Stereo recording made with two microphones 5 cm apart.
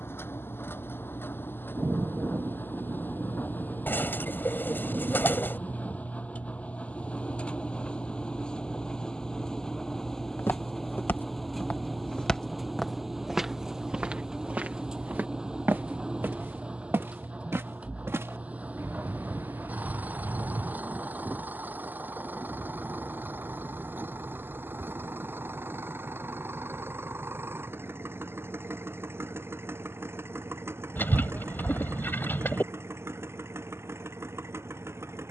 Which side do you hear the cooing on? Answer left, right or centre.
left.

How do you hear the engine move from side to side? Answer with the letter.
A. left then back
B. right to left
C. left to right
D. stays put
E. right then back
C.